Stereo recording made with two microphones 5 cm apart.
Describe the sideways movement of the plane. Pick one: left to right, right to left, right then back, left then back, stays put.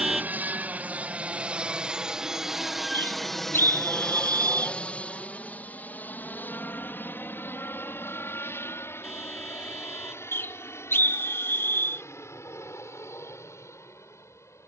right to left.